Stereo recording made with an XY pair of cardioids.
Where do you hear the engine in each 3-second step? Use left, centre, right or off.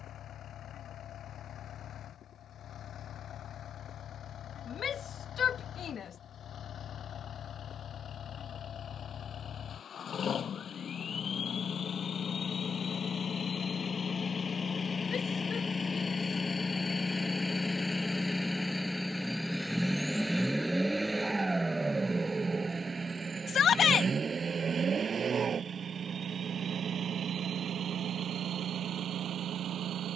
left, left, left, left, left, left, centre, right, right, right.